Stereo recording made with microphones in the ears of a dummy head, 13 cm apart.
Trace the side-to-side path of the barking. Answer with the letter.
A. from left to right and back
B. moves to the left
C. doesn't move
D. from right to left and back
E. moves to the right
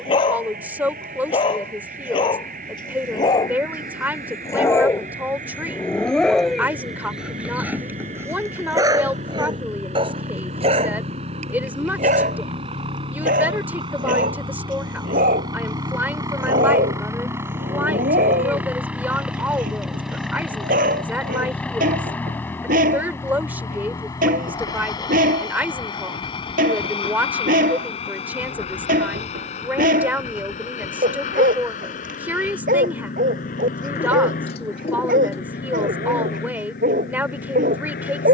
E.